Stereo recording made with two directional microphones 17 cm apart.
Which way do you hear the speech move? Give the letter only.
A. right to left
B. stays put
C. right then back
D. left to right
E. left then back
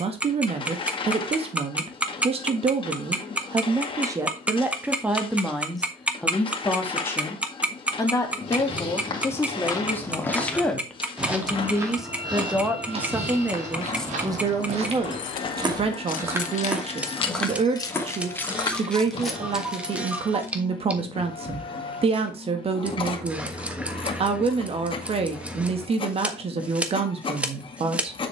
E.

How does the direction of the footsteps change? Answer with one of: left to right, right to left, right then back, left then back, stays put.
right then back.